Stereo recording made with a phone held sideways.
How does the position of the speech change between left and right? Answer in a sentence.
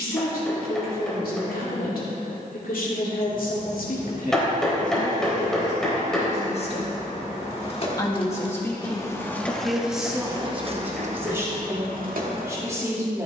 You can hear the speech move from left to right.